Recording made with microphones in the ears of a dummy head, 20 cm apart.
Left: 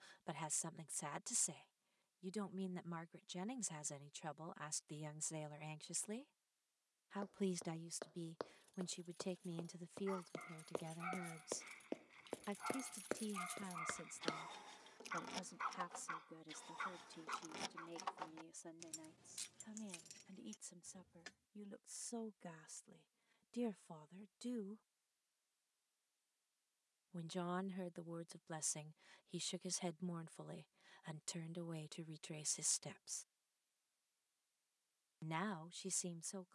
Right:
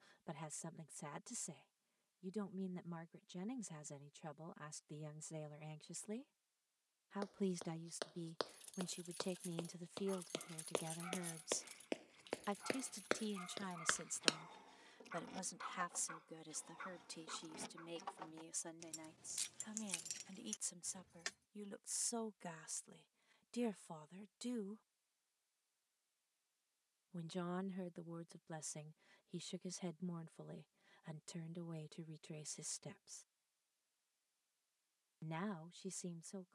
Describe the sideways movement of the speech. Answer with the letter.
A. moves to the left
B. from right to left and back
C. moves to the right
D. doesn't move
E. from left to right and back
E.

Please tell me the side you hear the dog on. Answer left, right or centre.
left.